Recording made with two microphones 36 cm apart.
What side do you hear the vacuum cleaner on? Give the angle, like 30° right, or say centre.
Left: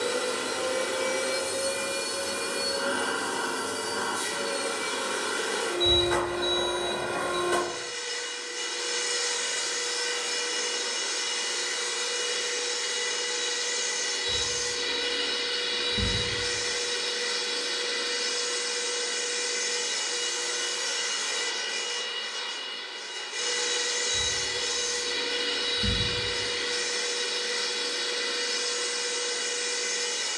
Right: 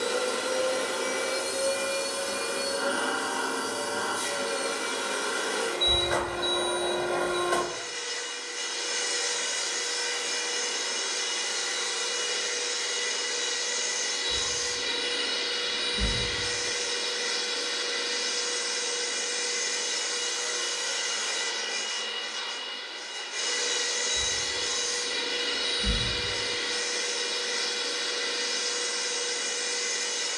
50° left.